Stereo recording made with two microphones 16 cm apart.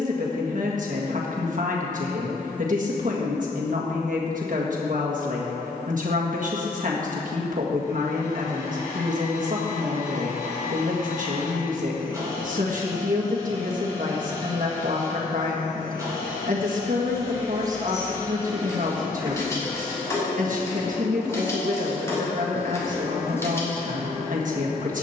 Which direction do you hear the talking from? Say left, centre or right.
right.